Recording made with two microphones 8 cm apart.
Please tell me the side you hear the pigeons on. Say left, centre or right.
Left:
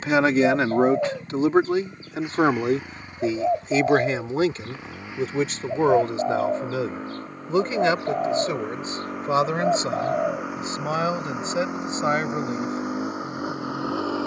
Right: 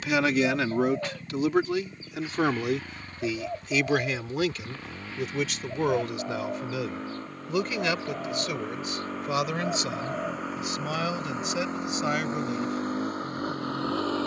left.